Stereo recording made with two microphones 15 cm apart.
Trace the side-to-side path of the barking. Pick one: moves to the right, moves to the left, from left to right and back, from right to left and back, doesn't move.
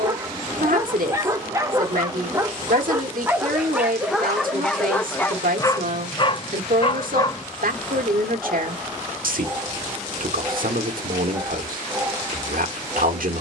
from right to left and back.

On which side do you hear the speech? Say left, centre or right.
right.